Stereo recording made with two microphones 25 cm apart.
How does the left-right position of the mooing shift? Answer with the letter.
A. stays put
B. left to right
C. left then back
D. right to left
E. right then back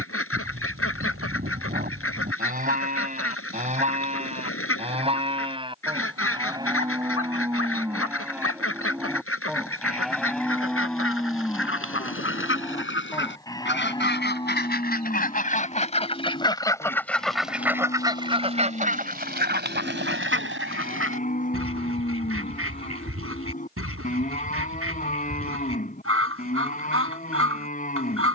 D.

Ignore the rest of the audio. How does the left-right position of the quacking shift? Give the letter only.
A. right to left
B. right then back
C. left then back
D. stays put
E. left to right
E.